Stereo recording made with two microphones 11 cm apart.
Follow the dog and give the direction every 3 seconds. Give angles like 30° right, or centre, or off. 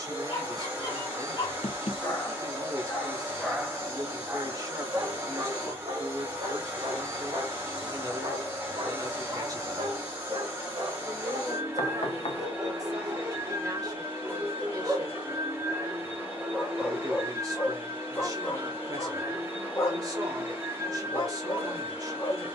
40° left, 30° right, 60° right, 50° right, 30° right, centre, 30° left, 40° left.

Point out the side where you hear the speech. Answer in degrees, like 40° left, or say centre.
40° right.